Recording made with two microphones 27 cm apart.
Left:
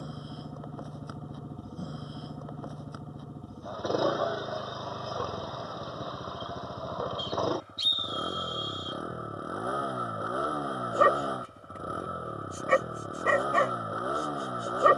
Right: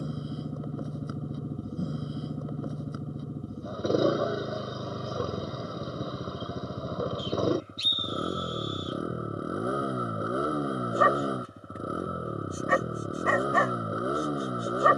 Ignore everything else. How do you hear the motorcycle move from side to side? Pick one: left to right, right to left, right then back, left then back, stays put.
stays put.